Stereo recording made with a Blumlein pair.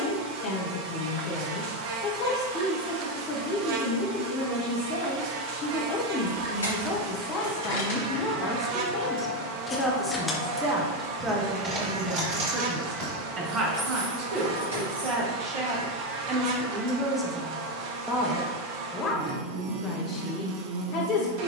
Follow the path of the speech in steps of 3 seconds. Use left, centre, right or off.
left, left, left, centre, right, right, left.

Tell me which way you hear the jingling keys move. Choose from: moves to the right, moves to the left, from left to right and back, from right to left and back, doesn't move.
moves to the right.